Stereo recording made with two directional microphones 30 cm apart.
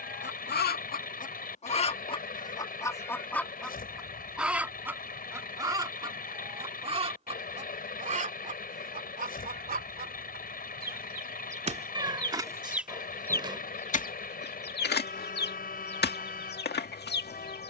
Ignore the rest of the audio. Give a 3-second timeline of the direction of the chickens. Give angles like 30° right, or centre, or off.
20° left, centre, 20° right, 30° right, 10° left, 30° left.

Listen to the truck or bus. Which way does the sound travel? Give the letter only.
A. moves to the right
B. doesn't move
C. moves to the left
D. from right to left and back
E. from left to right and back
B.